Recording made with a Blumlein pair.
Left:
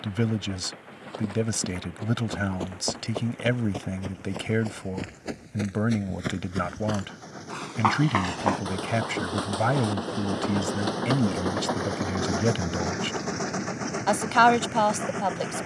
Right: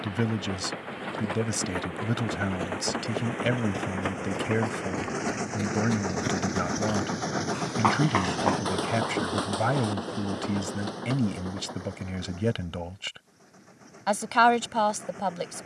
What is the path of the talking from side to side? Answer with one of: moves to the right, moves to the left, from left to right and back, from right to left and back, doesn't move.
doesn't move.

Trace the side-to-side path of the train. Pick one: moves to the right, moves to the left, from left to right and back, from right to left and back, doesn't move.
moves to the left.